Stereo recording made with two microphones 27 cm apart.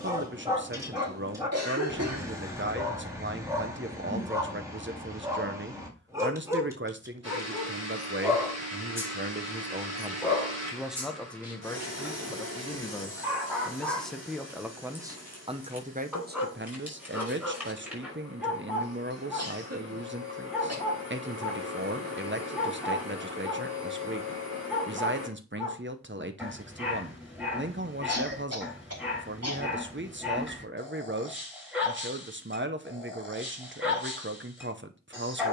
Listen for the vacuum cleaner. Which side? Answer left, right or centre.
right.